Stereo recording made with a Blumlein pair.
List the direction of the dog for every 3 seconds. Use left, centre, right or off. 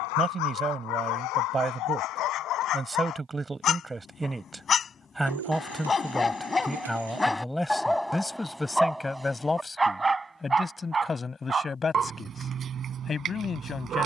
left, left, centre, centre, right.